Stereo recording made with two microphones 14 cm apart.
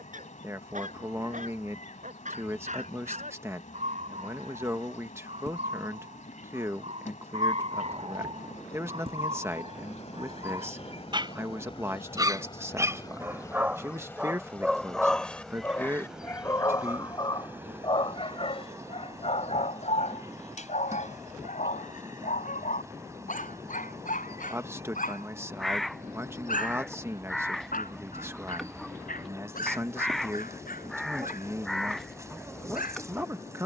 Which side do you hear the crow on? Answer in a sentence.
In this clip you hear the crow in the centre.